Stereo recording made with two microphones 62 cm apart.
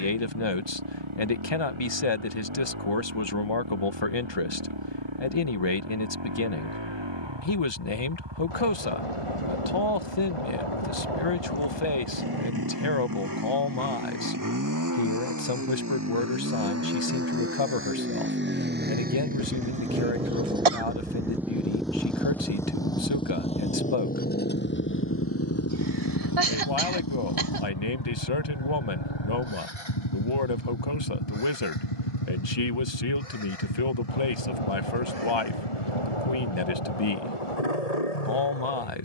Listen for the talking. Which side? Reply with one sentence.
You can hear the talking on the left.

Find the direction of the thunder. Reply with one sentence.
In this clip you hear the thunder on the left.